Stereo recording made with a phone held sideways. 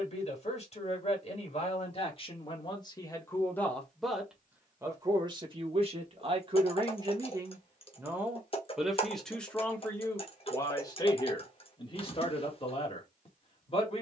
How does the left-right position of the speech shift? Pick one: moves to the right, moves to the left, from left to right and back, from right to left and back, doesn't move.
from left to right and back.